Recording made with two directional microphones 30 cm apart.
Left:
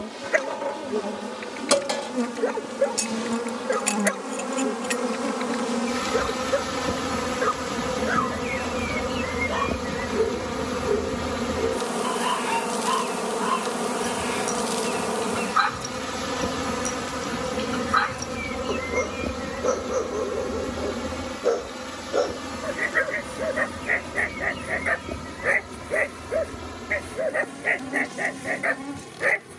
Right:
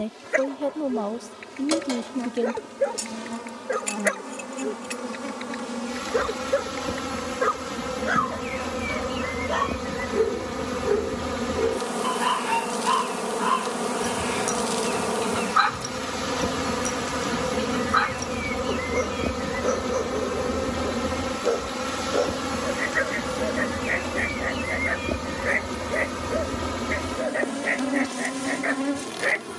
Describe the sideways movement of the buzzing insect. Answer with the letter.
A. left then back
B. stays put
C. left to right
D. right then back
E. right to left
C.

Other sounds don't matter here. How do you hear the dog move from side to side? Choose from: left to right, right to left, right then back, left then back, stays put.
right then back.